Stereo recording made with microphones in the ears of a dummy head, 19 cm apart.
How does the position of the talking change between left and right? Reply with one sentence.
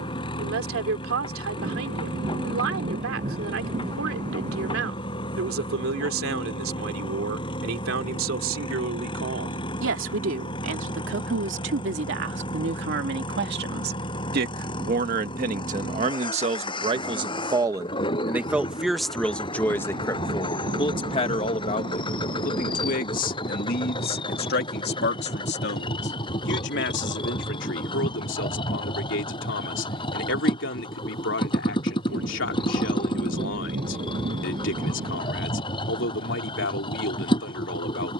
In this clip you hear the talking travel towards the left.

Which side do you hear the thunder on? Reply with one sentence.
You can hear the thunder on the right.